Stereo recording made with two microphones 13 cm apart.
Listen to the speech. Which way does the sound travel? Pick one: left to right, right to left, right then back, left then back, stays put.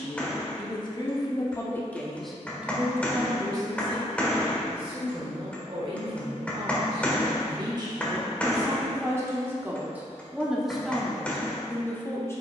right then back.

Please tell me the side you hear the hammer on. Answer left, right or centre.
centre.